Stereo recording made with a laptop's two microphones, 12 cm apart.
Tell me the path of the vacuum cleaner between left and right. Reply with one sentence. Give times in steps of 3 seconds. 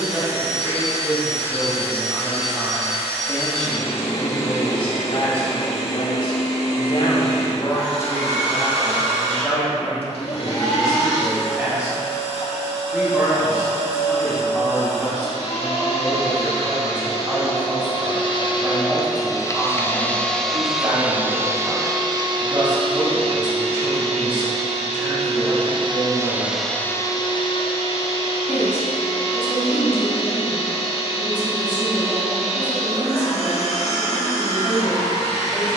In this clip you hear the vacuum cleaner on the left from 0 s, on the right from 21 s and on the left from 27 s.